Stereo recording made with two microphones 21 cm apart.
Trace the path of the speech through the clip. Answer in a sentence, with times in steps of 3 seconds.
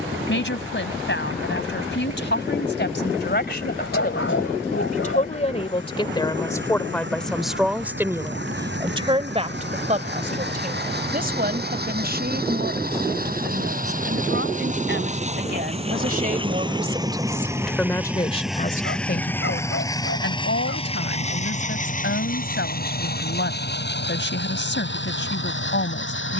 You can hear the speech on the left from 0 s, in the centre from 6 s, on the right from 9 s and on the left from 18 s.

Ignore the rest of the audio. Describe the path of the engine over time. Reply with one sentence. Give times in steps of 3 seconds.
In this clip you hear the engine on the right from 0 s, in the centre from 18 s and on the left from 21 s.